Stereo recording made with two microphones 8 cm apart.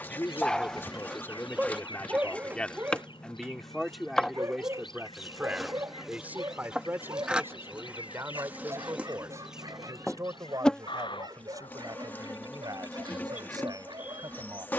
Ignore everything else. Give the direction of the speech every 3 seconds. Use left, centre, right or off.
left, centre, right, right, right.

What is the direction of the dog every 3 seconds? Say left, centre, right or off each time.
centre, right, right, right, right.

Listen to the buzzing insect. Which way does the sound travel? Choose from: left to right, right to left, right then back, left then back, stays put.
right then back.